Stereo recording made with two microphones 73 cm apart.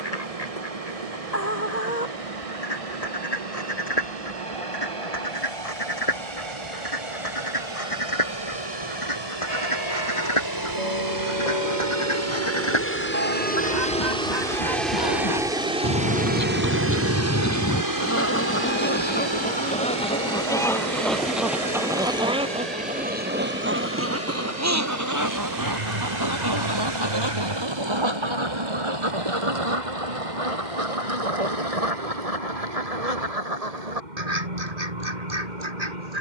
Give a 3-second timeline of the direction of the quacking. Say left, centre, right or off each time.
left, left, left, left, left, left, centre, centre, right, right, right, right.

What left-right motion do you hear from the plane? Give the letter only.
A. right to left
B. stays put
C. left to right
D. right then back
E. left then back
C.